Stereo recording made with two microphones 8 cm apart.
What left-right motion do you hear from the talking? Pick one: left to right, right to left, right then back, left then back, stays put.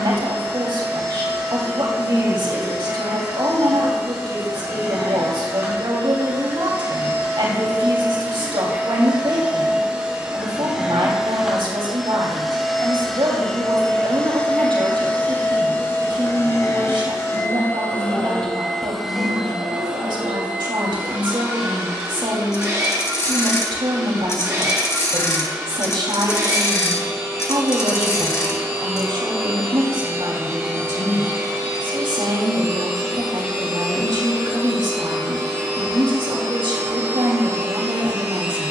stays put.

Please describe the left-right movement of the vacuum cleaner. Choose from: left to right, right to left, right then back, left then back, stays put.
left then back.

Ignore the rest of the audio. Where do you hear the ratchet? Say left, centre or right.
left.